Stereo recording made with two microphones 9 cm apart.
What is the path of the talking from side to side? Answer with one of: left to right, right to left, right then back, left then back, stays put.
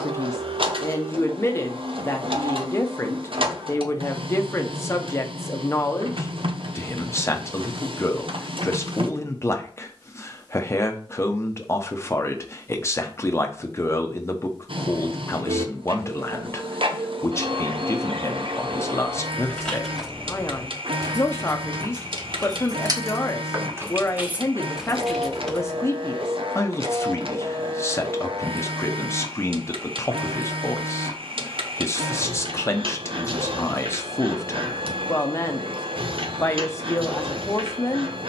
stays put.